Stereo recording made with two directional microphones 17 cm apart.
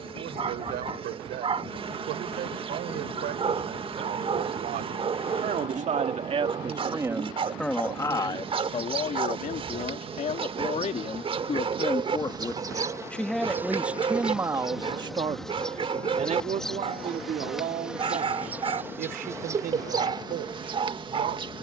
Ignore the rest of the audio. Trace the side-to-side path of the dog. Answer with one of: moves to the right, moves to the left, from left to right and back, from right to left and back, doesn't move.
doesn't move.